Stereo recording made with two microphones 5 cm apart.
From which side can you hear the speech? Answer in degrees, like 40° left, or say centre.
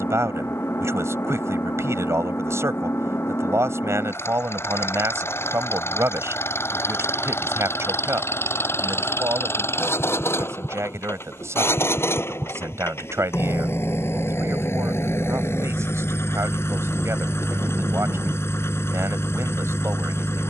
80° right.